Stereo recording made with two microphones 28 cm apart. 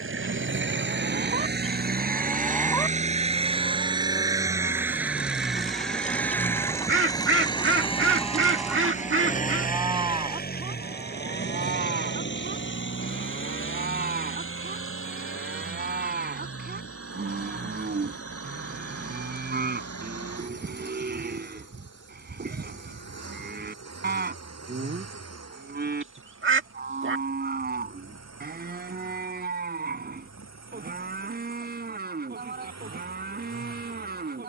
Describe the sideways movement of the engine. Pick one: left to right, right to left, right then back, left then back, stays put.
right to left.